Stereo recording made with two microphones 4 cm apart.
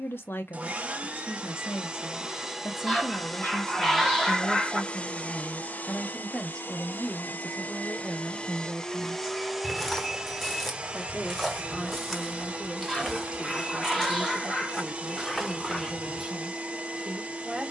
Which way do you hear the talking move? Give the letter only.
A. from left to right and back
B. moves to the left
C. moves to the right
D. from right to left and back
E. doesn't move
C.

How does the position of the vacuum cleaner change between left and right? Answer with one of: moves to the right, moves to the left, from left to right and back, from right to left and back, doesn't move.
from right to left and back.